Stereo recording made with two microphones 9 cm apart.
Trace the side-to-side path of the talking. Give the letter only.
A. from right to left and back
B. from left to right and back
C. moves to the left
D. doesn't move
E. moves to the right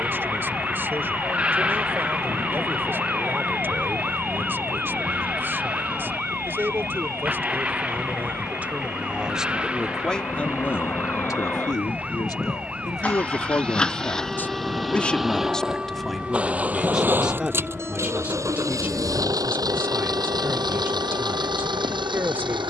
A.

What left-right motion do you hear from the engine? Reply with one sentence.
You can hear the engine move to the right.